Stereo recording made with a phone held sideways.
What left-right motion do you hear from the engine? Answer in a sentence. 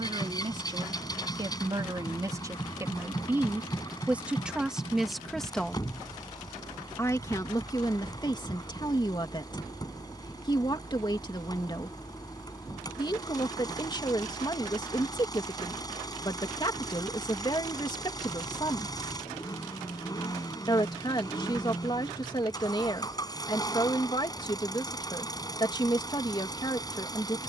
You can hear the engine stay put.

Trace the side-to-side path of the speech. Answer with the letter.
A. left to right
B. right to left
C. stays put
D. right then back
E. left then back
B.